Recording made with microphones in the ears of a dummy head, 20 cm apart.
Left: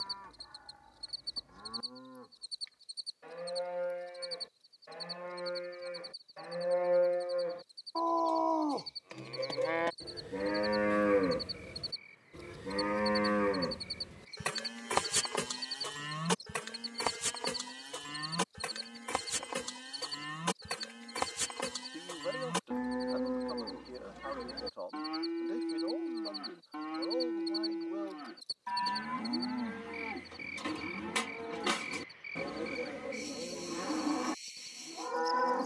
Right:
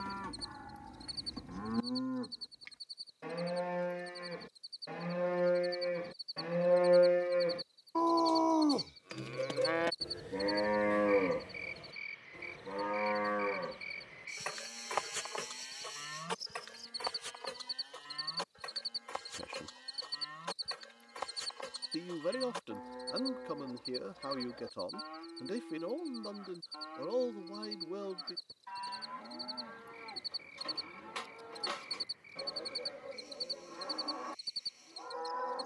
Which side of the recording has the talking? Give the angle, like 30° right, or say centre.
40° right.